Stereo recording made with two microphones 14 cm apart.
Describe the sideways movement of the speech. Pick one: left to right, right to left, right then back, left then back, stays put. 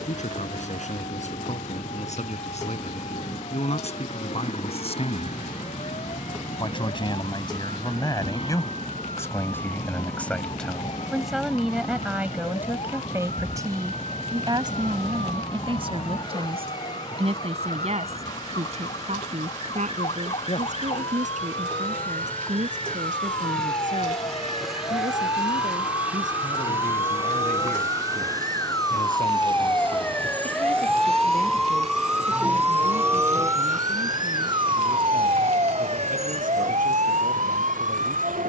left to right.